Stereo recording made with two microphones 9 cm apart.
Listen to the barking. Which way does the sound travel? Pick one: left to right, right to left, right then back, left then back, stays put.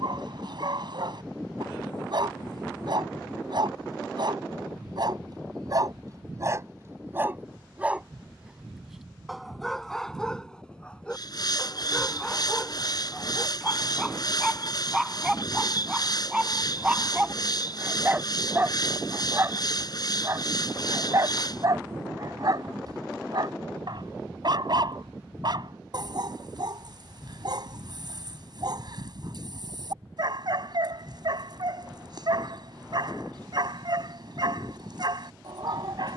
left then back.